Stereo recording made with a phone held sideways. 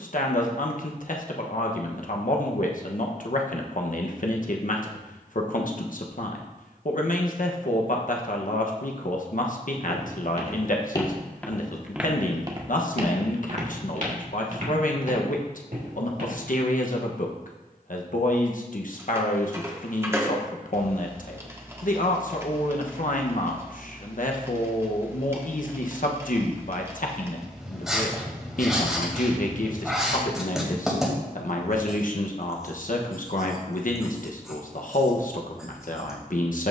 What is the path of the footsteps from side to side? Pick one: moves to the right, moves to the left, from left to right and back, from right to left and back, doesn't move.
moves to the right.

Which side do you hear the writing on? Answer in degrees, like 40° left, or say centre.
centre.